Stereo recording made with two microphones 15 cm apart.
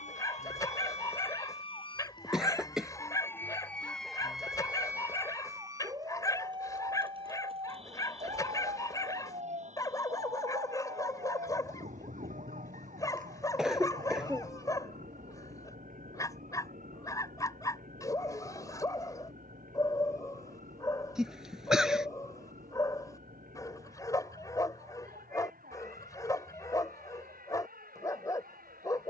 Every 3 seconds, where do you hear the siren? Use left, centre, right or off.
left, centre, right, right, right, right, right, right, right, right.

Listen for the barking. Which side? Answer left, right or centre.
left.